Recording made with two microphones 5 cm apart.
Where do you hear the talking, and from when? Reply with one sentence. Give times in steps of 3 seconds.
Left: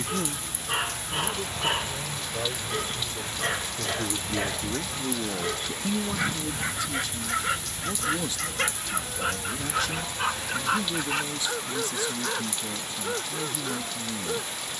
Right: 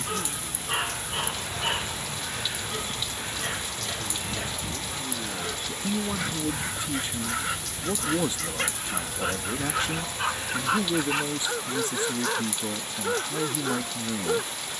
In this clip you hear the talking on the left from 0 s and on the right from 6 s.